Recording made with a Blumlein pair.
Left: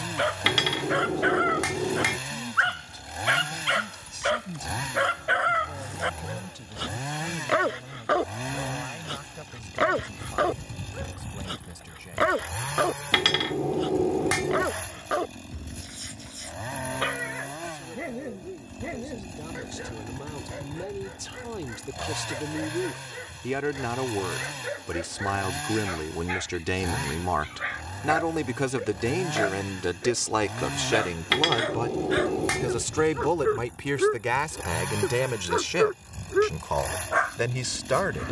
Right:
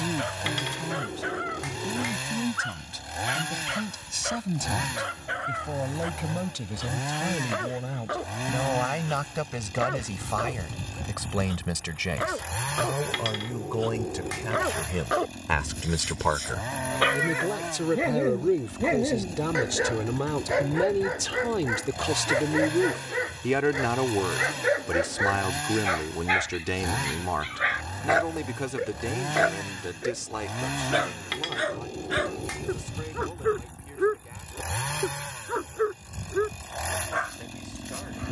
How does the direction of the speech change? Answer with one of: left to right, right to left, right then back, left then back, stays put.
right to left.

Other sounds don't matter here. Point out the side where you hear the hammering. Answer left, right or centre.
left.